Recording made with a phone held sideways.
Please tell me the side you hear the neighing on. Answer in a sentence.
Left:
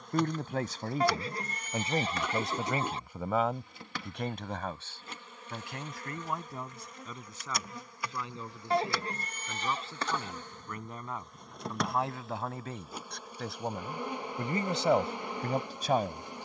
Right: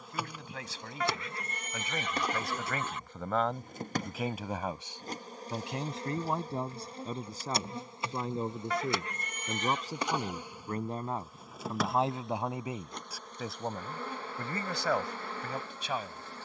In this clip you hear the neighing on the left.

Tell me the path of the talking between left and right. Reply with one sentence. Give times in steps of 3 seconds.
In this clip you hear the talking on the left from 0 s, in the centre from 3 s, on the right from 6 s, in the centre from 12 s and on the left from 15 s.